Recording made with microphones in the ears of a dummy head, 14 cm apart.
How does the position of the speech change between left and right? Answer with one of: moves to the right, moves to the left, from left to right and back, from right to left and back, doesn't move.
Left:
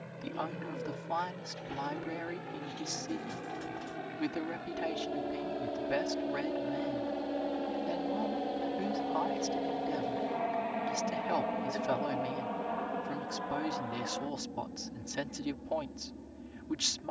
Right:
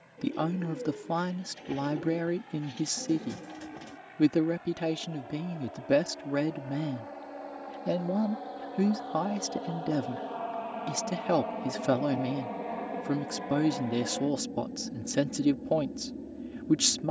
doesn't move.